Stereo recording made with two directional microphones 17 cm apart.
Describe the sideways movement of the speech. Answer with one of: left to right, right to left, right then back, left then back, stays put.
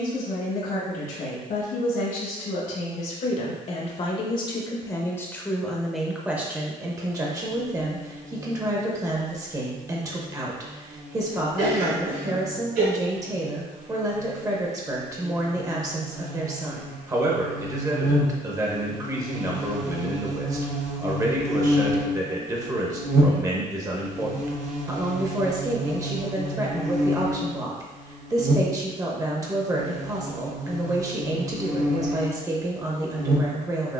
left to right.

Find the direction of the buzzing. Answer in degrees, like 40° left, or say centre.
50° right.